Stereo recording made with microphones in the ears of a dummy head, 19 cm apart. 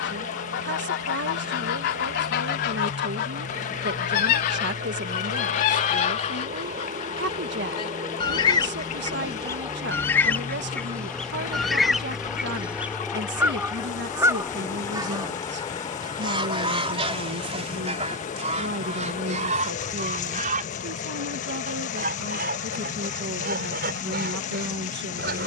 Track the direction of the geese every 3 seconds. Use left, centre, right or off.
left, left, left, centre, centre, right, right, right, right.